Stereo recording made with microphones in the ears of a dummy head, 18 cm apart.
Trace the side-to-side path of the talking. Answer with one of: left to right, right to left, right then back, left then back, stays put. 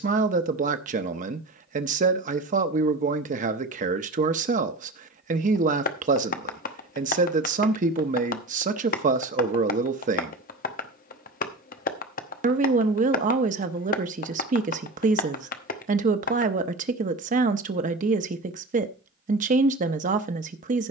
stays put.